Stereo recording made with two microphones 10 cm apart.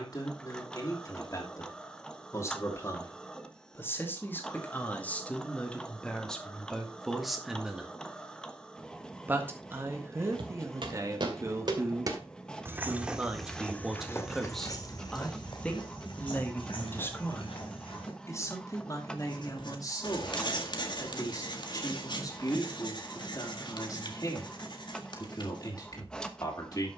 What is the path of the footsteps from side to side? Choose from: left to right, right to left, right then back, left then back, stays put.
right to left.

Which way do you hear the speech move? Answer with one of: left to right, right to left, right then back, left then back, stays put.
right then back.